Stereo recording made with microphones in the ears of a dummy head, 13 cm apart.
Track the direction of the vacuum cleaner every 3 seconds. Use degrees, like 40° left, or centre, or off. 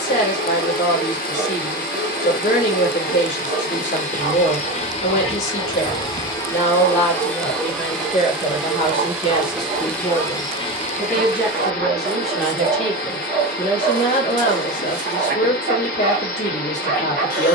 70° left, 50° left, 10° left, 30° left, 70° left, 70° left.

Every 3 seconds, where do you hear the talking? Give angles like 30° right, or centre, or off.
50° left, 50° left, 40° left, 20° left, 20° left, 50° left.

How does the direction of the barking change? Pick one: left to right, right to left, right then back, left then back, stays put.
stays put.